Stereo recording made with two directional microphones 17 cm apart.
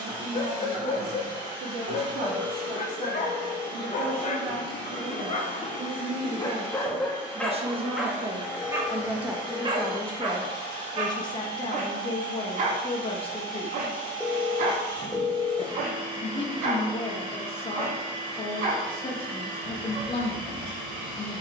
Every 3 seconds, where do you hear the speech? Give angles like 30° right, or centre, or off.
60° right, 60° right, 40° right, 10° left, 30° left, 30° left, 30° left.